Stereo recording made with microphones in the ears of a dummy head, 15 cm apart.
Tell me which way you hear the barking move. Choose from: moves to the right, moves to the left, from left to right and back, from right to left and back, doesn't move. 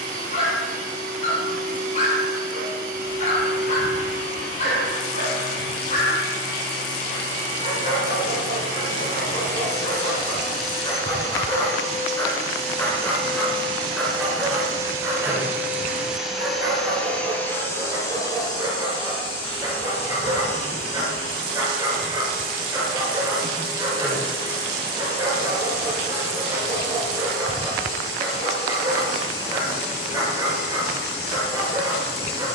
moves to the right.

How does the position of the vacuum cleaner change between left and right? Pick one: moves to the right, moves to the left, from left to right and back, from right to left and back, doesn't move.
moves to the left.